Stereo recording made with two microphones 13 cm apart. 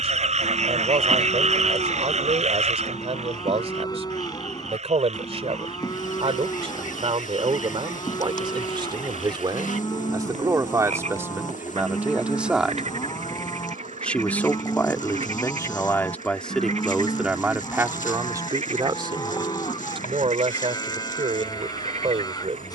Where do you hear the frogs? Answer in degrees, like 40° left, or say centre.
60° right.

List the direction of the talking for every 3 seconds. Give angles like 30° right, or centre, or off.
50° right, 50° right, 40° right, 20° right, centre, centre, 40° right, 50° right.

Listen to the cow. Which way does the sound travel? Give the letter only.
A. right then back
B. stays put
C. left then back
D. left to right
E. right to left
B.